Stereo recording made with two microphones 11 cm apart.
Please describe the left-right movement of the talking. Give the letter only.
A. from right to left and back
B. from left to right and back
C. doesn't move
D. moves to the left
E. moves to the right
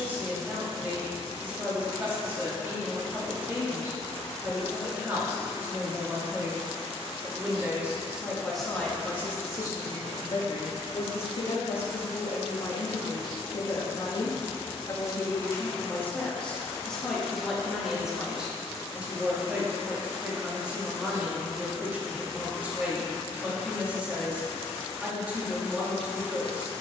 A.